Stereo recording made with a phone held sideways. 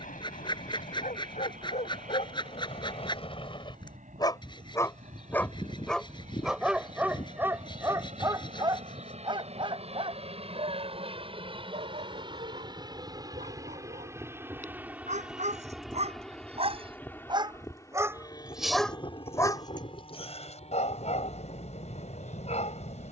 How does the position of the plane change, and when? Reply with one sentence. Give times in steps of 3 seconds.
You can hear the plane on the right from 0 s, in the centre from 15 s and on the left from 18 s.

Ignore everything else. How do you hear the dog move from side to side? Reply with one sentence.
In this clip you hear the dog go right and come back.